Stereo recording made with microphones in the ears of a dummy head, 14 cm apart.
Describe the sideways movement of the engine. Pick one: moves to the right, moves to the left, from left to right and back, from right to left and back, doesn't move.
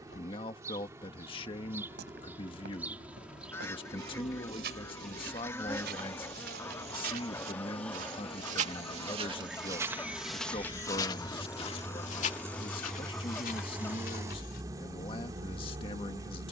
moves to the right.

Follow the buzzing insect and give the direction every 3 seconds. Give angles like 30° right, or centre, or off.
20° right, centre, 10° left, 10° right, 20° right, 20° right.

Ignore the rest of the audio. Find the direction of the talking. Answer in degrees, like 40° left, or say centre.
30° left.